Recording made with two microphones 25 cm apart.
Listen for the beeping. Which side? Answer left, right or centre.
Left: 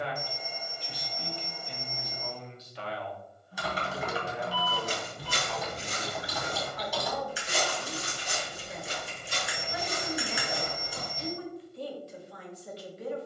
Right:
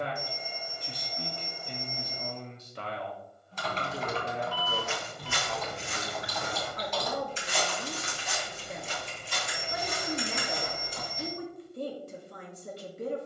right.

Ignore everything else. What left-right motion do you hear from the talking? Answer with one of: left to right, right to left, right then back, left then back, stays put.
stays put.